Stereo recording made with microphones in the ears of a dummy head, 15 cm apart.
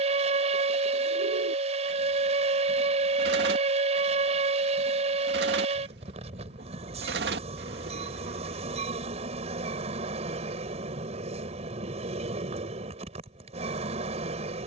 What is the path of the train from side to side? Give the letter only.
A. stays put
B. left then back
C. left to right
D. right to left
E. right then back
A.